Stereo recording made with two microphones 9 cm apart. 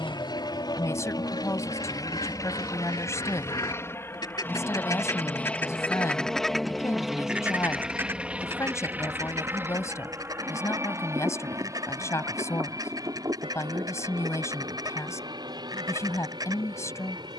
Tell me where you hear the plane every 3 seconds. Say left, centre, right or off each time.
left, left, centre, right, right, right.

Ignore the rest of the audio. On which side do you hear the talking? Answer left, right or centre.
left.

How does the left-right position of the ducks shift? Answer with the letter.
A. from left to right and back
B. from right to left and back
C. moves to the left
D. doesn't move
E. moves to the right
E.